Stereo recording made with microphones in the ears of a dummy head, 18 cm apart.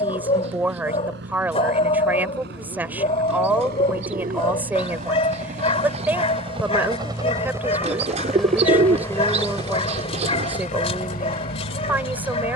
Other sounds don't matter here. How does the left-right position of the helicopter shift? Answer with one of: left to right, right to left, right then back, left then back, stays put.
right to left.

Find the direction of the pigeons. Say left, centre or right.
right.